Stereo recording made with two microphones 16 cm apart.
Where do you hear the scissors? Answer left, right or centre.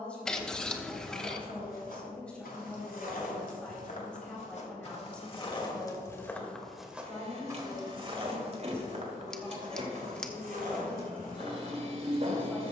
centre.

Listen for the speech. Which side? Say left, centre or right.
centre.